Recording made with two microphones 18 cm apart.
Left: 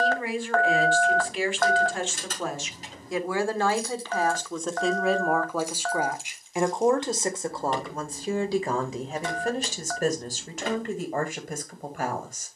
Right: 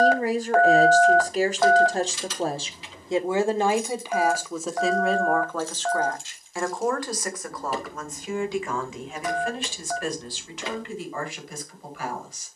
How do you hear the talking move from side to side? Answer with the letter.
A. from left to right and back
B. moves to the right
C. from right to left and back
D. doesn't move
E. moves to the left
E.